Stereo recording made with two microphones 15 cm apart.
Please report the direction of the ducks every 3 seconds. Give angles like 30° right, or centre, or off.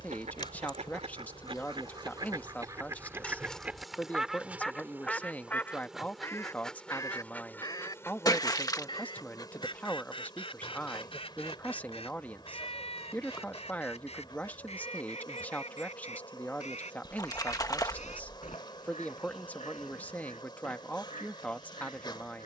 40° right, centre, 20° left, 40° left, 40° left, 50° left, 50° left, 50° left.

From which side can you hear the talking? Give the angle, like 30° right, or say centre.
10° left.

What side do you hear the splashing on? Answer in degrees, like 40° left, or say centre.
20° left.